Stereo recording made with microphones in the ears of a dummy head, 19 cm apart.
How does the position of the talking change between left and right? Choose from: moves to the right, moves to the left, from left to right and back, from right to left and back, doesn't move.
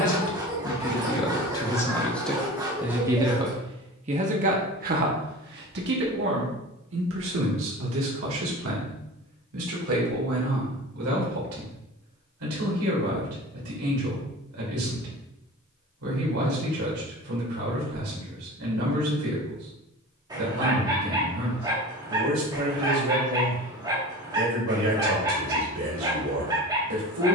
moves to the right.